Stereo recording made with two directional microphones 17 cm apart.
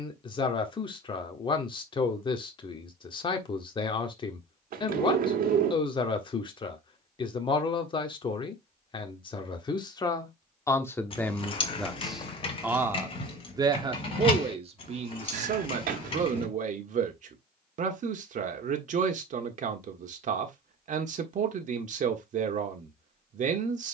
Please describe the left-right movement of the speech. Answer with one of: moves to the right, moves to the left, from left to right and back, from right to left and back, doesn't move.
moves to the right.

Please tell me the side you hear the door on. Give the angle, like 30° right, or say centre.
60° right.